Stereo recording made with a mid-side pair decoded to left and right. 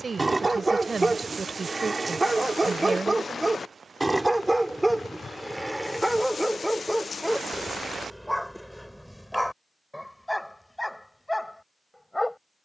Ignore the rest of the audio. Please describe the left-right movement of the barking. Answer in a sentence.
In this clip you hear the barking go from the right side to the left.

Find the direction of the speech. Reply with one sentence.
You can hear the speech on the right.